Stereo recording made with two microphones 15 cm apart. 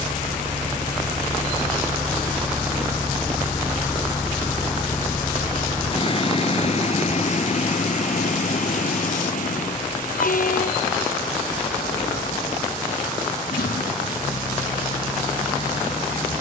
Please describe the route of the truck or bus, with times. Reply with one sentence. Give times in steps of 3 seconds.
In this clip you hear the truck or bus on the right from 0 s, in the centre from 3 s and on the left from 6 s.